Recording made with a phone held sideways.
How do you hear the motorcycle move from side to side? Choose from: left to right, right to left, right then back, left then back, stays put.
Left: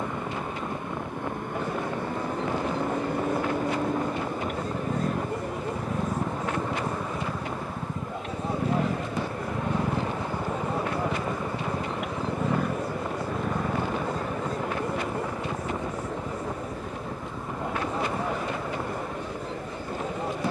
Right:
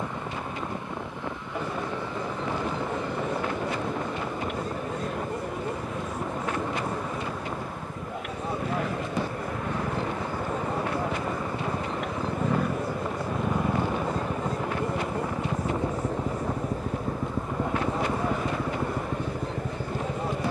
left to right.